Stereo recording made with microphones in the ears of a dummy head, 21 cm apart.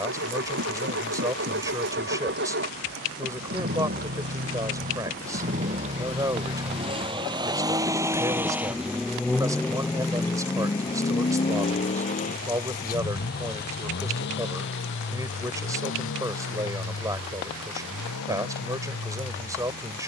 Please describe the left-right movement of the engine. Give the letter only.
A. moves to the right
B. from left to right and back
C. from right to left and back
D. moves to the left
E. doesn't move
D.